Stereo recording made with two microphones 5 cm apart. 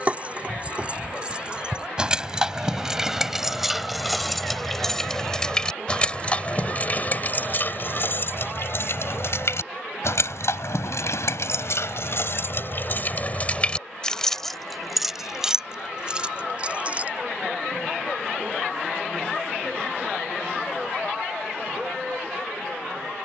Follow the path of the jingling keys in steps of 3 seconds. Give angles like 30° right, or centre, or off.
20° right, centre, 40° left, 70° left, 30° left, 20° right, off, off.